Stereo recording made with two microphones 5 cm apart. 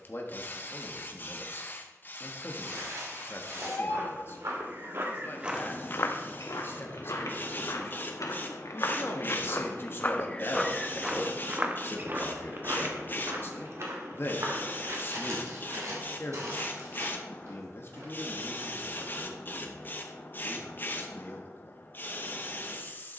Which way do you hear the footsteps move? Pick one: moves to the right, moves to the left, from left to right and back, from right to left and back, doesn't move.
from right to left and back.